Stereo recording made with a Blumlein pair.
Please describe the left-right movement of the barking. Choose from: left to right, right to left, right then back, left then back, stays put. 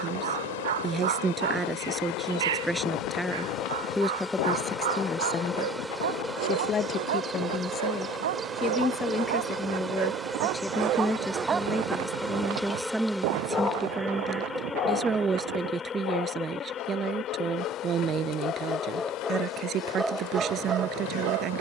left then back.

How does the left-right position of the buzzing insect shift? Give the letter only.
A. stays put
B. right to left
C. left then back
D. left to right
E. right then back
E.